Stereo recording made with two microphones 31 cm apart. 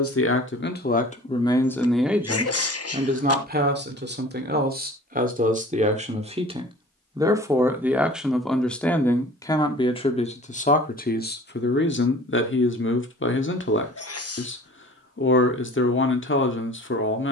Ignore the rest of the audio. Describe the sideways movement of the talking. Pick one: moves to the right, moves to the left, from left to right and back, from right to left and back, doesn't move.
from left to right and back.